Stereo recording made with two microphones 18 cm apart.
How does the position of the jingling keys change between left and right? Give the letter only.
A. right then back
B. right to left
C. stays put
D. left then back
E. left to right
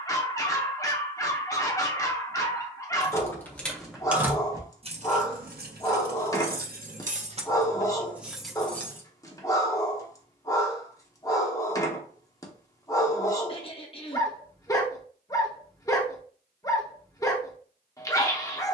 A.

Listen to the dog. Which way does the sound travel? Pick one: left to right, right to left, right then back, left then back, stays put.
stays put.